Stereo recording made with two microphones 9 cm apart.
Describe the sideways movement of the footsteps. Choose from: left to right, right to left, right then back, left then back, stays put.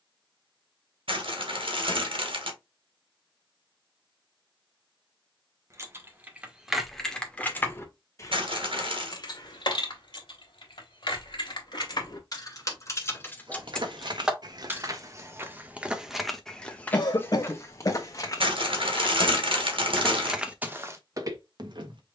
left then back.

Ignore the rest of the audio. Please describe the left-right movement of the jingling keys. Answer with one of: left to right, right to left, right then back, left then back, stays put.
left then back.